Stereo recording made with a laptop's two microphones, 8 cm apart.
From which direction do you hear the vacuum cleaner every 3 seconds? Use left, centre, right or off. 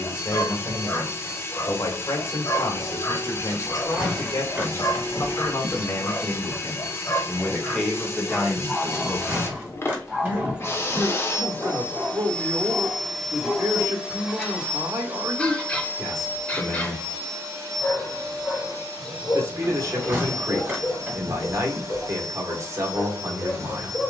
left, left, left, left, centre, right, right, right.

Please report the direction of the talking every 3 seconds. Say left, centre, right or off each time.
left, left, centre, right, right, right, right, right.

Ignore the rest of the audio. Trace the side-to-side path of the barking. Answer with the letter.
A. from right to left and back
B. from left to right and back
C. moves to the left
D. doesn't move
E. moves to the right
B.